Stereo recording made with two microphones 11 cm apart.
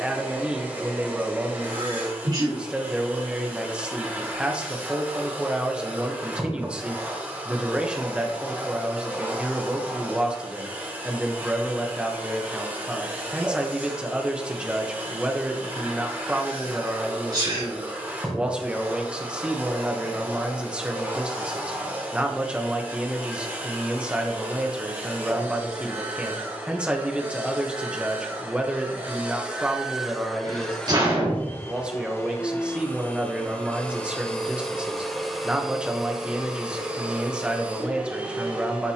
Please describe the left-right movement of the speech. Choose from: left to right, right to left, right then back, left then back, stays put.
stays put.